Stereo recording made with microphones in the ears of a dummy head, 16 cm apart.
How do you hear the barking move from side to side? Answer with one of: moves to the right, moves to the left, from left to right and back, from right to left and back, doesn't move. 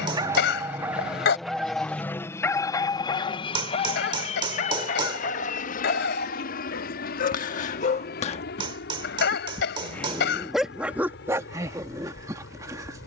from right to left and back.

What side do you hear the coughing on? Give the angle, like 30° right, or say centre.
70° left.